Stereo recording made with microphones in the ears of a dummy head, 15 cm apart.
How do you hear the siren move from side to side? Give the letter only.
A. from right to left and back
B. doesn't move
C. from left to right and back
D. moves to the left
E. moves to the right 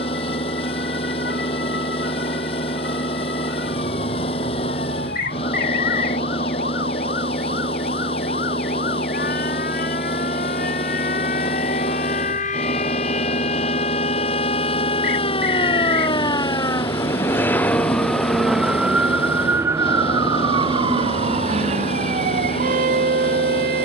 E.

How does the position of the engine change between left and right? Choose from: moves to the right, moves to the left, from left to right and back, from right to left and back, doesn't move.
doesn't move.